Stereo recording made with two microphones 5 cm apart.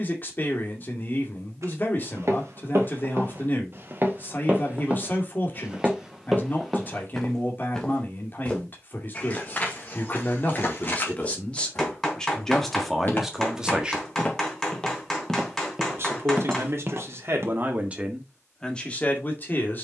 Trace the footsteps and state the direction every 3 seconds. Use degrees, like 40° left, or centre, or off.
60° right, 30° right, 10° left, 30° left, 30° left, 20° right, off.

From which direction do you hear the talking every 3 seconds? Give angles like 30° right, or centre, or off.
40° left, 40° left, 40° left, 30° left, centre, 50° right, 20° left.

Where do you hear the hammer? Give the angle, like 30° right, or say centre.
10° left.